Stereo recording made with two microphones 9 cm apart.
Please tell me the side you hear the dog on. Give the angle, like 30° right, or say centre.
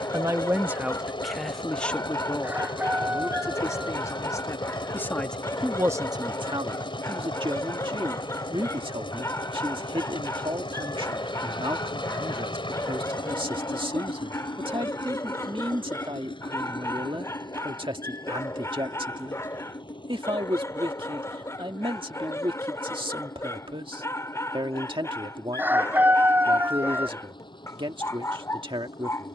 30° left.